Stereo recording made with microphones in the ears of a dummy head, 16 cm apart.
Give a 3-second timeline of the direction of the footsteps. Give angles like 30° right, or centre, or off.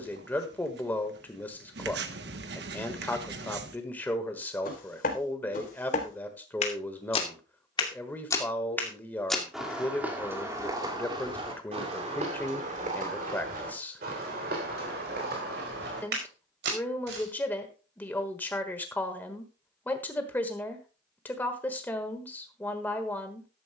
off, 50° left, 30° left, 20° right, 50° right, 60° right, off, off.